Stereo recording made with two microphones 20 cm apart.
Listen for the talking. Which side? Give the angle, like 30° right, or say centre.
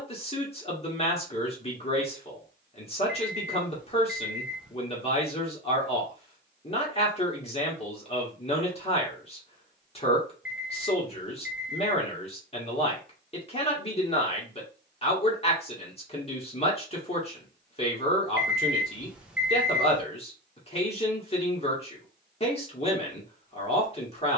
30° left.